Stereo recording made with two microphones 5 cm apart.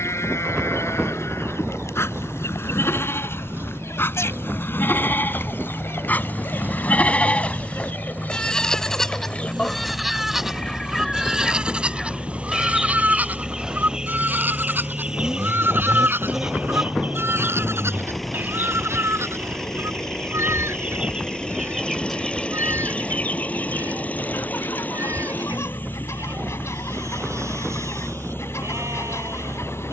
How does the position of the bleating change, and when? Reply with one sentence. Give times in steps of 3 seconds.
You can hear the bleating on the left from 0 s, in the centre from 9 s and on the right from 12 s.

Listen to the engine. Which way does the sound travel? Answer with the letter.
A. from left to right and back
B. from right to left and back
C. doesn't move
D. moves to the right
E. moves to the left
E.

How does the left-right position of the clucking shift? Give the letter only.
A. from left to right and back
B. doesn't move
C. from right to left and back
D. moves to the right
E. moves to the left
A.